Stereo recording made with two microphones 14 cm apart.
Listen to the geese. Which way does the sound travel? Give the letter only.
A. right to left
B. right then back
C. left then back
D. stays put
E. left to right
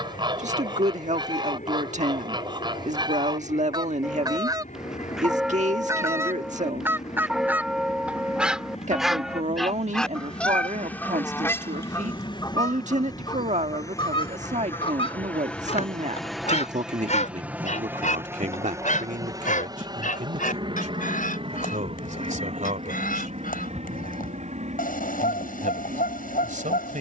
A.